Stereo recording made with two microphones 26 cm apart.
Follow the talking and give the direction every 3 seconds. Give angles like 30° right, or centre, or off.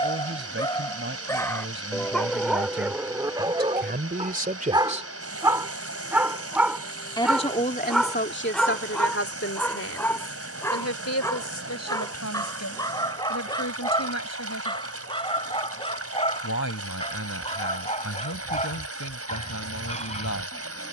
50° right, 30° right, 40° left, 70° left, 80° left, 80° left, 80° left.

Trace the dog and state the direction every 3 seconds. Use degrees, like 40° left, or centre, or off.
10° left, 20° right, centre, 10° left, 20° left, 20° left, 30° left.